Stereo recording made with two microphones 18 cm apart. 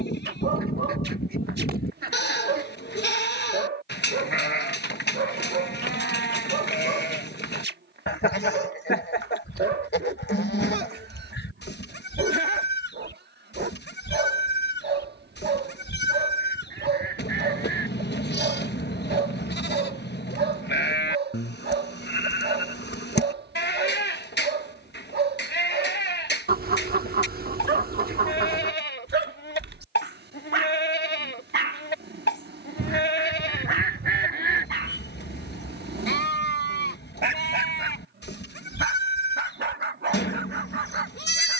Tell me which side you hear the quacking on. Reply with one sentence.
In this clip you hear the quacking on the right.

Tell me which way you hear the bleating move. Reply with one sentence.
You can hear the bleating stay put.